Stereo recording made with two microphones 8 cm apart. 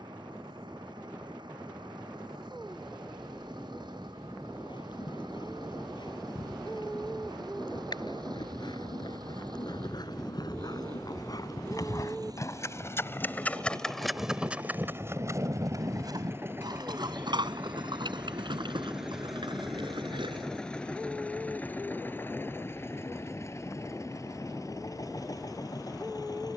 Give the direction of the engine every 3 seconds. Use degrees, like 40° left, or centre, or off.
70° right, 70° right, 60° right, 60° right, 50° right, 30° right, centre, 30° left, 50° left.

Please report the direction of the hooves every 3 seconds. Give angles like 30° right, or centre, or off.
off, 70° left, 70° left, 60° left, 10° left, 60° right, 80° right, off, off.